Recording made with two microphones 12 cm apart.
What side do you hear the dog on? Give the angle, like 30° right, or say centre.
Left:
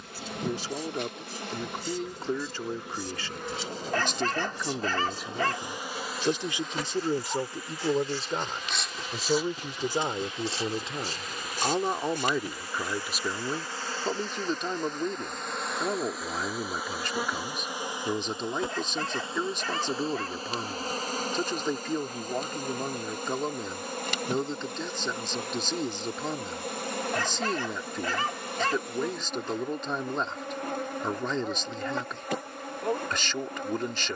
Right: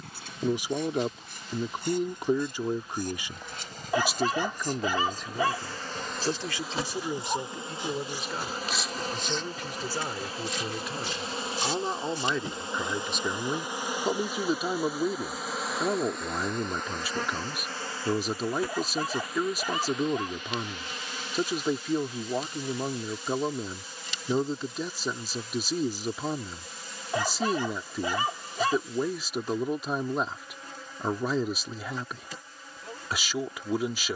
10° right.